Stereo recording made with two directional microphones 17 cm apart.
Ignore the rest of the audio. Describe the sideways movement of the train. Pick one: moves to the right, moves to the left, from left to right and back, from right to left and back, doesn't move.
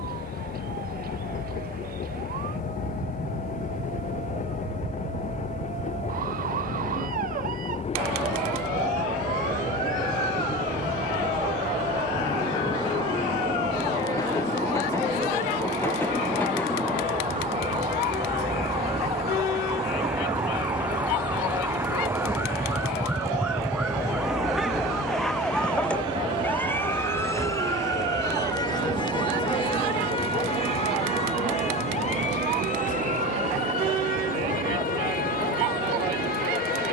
moves to the right.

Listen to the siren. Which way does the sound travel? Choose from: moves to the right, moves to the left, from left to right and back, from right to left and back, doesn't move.
moves to the left.